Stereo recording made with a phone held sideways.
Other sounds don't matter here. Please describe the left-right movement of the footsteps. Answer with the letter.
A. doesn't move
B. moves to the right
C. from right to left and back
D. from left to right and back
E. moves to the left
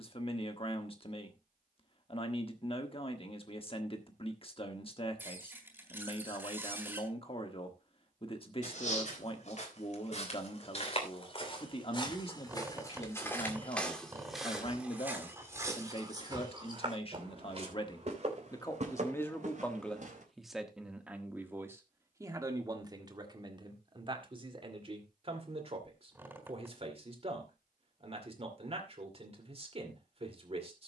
B.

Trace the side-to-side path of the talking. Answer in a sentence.
In this clip you hear the talking go from the left side to the right.